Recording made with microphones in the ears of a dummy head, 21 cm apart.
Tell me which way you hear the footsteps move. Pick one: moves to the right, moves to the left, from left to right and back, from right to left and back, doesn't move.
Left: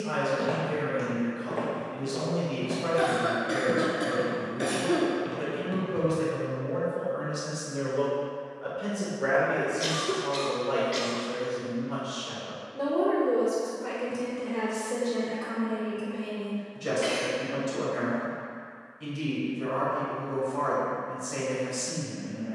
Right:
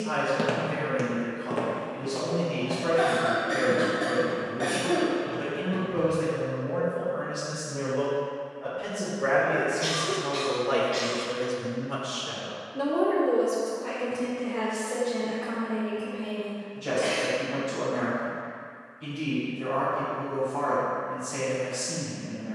moves to the left.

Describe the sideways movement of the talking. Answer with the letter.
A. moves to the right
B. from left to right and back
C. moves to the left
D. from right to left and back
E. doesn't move
B.